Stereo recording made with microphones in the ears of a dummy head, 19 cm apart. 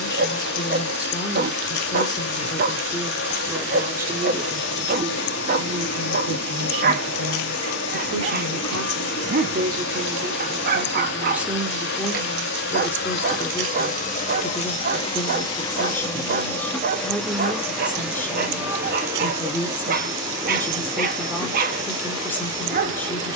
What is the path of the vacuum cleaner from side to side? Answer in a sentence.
You can hear the vacuum cleaner go from the left side to the right.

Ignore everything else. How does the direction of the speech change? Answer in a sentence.
In this clip you hear the speech go right and come back.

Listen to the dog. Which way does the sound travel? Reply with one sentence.
You can hear the dog stay in one place.